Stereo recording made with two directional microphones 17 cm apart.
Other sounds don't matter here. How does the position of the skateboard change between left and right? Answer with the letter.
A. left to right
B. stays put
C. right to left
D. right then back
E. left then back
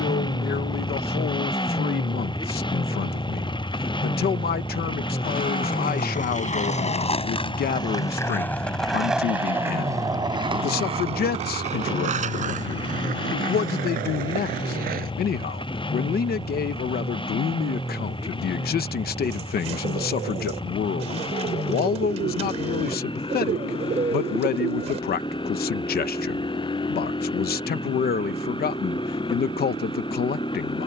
A.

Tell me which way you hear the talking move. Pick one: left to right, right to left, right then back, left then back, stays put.
stays put.